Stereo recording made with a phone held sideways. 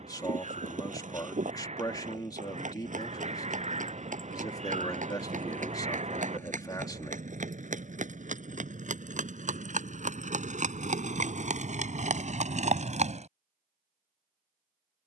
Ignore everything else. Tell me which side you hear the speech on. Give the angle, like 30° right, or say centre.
20° left.